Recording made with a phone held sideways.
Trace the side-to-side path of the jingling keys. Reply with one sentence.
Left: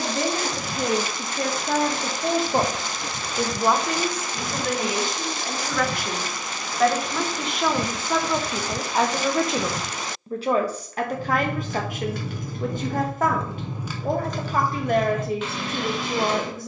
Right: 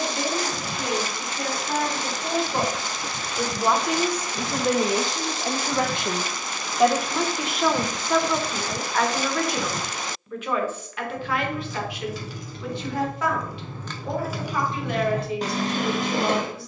In this clip you hear the jingling keys move to the right.